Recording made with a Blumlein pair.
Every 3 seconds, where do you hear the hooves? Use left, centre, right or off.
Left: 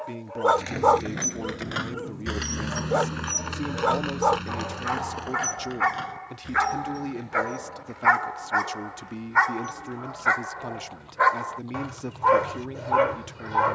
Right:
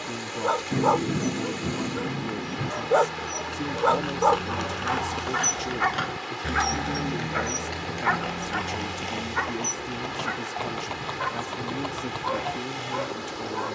left, centre, right, right, right.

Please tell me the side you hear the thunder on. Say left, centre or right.
right.